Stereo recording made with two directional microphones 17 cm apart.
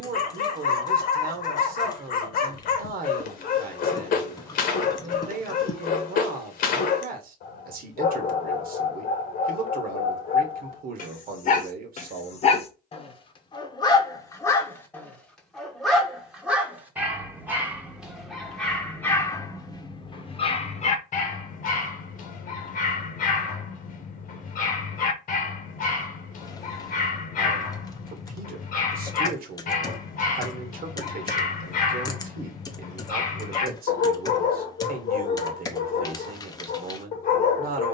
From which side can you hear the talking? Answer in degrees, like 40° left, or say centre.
60° right.